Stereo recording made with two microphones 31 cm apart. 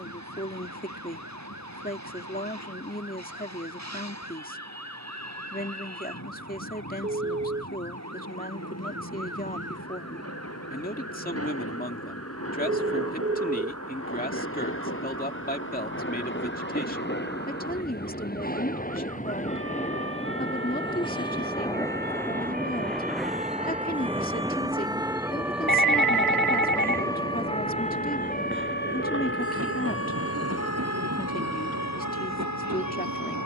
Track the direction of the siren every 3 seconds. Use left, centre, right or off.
right, right, right, right, right, right, right, right, centre, left, left.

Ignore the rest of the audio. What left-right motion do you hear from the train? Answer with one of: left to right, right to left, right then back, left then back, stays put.
left to right.